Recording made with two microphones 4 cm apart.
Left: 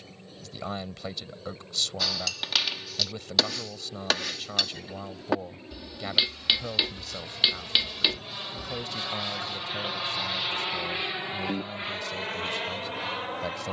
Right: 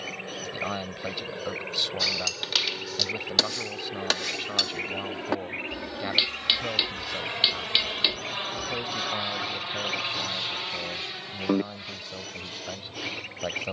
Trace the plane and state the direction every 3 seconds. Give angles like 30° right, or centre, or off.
70° right, 60° right, 40° right, 10° left, 40° left.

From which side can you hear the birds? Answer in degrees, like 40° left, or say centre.
70° right.